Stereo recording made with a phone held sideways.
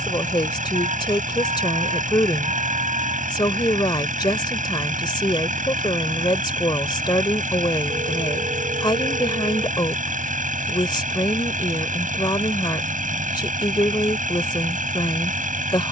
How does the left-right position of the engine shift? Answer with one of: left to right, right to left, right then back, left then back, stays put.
stays put.